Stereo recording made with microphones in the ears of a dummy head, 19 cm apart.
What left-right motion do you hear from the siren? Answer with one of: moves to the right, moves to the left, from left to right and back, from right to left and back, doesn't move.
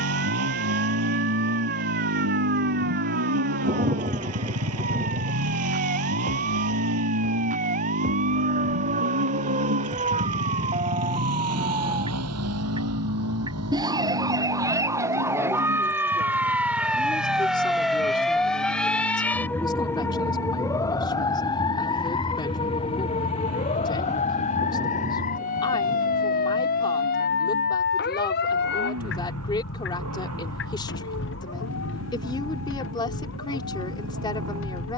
moves to the left.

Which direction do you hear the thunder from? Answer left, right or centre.
right.